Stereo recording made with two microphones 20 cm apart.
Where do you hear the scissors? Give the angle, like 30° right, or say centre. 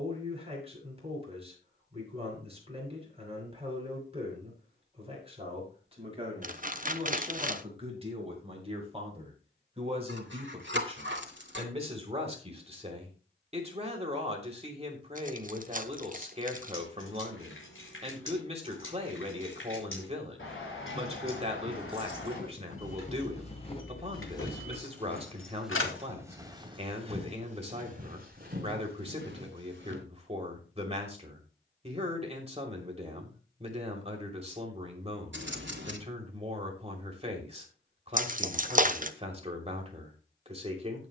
60° right.